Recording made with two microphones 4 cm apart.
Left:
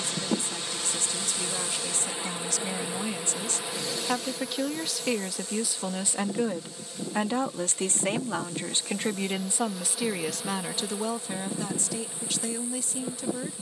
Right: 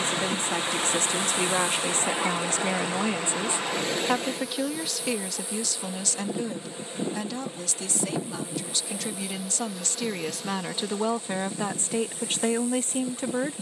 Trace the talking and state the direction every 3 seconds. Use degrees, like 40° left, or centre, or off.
50° right, 10° right, 30° left, 10° right, 40° right.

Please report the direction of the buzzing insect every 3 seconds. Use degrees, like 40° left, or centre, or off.
20° left, centre, 20° right, 10° left, 20° left.